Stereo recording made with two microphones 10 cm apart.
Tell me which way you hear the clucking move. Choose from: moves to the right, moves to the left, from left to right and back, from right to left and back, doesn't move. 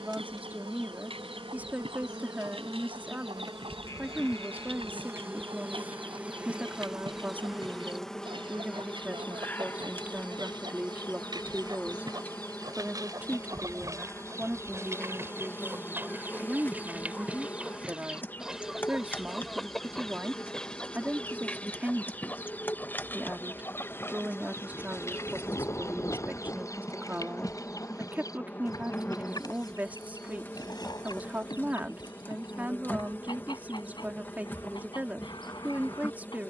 moves to the left.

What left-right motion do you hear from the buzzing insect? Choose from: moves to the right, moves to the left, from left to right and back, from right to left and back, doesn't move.
moves to the left.